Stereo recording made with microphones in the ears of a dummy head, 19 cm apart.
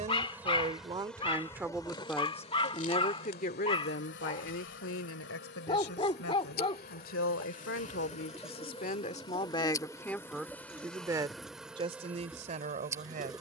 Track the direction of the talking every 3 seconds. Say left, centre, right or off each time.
centre, left, left, centre, right.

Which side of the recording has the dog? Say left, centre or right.
left.